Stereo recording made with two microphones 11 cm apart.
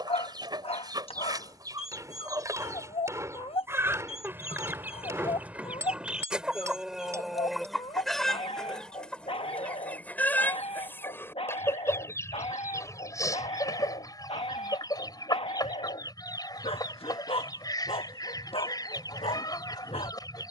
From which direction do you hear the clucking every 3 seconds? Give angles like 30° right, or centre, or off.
30° right, 20° right, centre, 10° left, 30° left, 30° left, 30° left.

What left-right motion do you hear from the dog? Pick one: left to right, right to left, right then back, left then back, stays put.
stays put.